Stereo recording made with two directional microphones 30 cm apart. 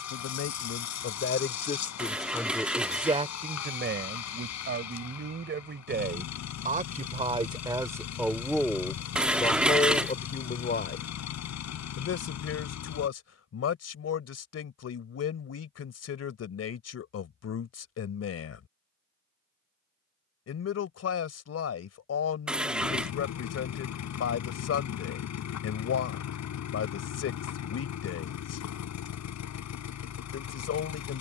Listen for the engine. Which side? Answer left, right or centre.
left.